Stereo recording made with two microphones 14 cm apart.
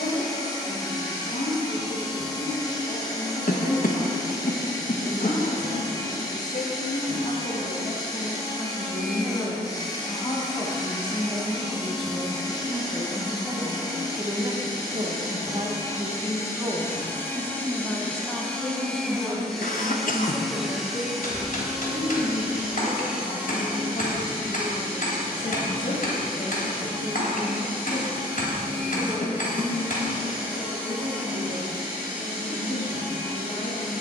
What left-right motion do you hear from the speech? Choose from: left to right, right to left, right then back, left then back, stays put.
right then back.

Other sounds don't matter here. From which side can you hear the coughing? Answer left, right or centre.
left.